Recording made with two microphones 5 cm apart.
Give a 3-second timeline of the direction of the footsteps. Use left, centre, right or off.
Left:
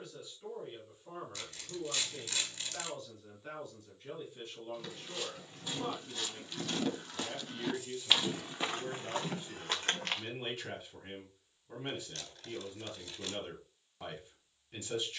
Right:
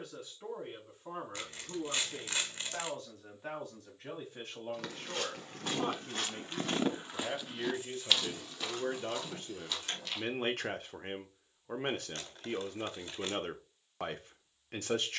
off, right, centre, left, off.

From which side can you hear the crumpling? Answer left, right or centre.
right.